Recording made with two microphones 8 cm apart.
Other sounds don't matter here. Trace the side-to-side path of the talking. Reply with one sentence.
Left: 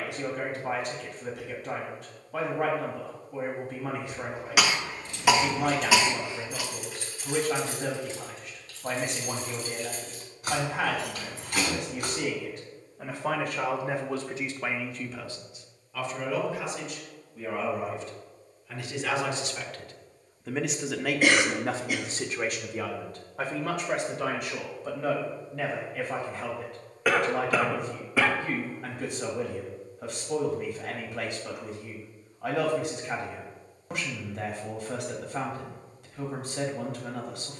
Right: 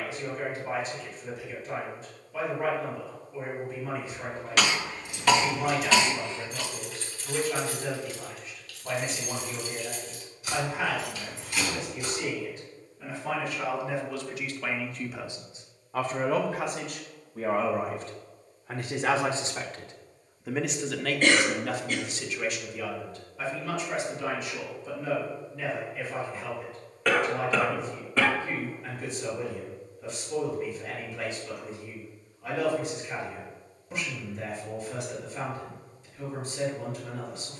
You can hear the talking move from left to right and back again.